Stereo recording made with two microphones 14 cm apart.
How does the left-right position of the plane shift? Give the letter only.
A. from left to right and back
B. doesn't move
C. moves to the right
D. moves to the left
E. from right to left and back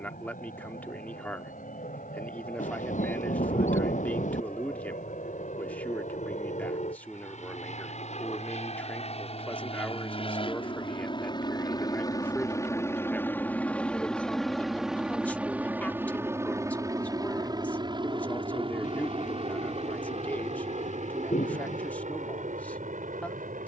C.